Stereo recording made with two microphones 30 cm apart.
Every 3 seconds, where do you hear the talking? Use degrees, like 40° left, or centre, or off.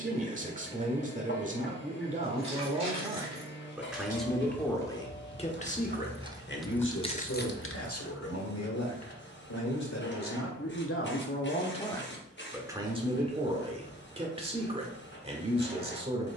20° right, 10° left, 50° left, 50° left, 20° right, 20° right.